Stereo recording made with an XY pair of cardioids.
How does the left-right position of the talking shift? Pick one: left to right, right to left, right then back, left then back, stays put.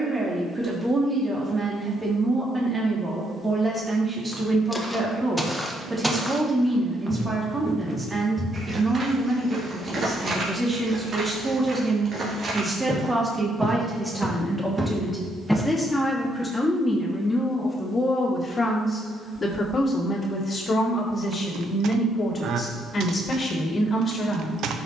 right to left.